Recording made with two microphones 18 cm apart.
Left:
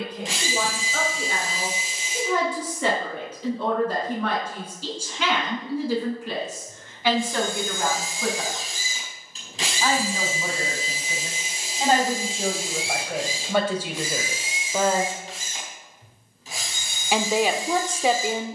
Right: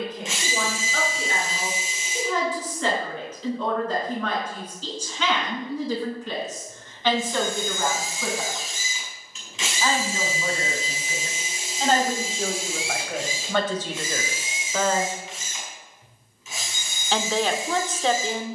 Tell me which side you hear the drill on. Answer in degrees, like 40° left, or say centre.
40° left.